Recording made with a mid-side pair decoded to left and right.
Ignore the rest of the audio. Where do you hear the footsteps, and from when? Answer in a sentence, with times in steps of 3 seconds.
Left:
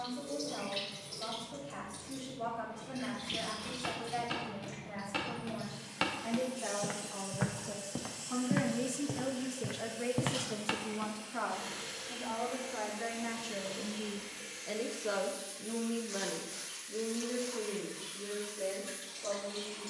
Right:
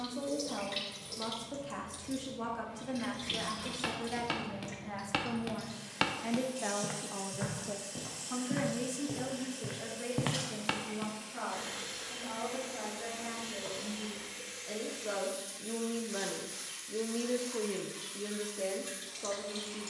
You can hear the footsteps not at all from 0 s, on the right from 3 s, on the left from 6 s, in the centre from 9 s, on the right from 12 s and not at all from 15 s.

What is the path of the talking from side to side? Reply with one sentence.
You can hear the talking go left and come back.